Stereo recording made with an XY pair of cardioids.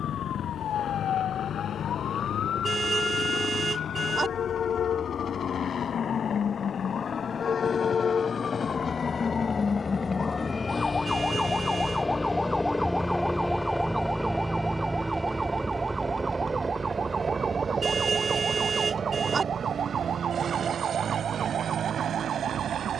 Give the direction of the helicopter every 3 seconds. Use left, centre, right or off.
left, left, left, left, centre, right, right, right.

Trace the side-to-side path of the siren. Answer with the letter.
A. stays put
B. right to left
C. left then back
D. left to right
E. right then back
D.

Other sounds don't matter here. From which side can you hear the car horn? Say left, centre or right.
right.